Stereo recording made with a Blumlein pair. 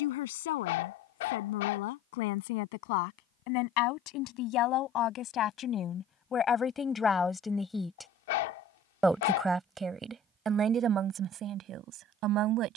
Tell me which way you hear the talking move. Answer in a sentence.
You can hear the talking move from left to right.